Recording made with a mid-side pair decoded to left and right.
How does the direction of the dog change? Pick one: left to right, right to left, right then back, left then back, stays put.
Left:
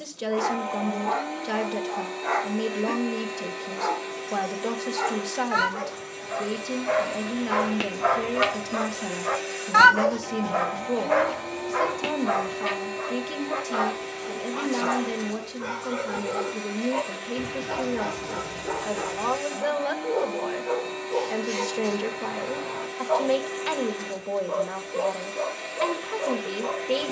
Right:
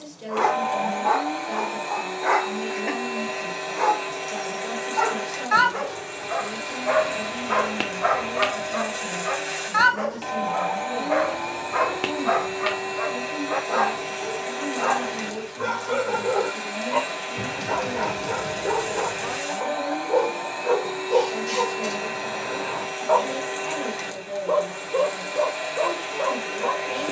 left then back.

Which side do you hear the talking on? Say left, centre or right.
left.